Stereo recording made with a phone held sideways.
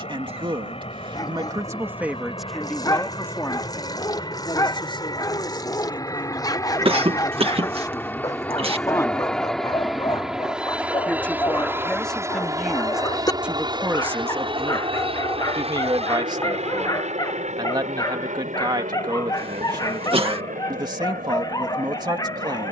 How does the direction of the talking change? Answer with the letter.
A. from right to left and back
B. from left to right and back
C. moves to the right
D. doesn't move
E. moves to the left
A.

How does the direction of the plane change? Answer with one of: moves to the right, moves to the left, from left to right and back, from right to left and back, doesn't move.
moves to the right.